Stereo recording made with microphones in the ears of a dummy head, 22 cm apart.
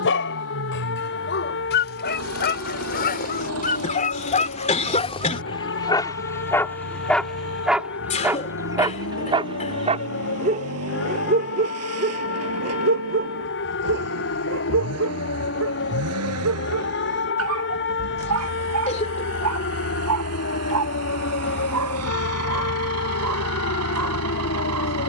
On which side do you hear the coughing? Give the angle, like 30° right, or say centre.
30° left.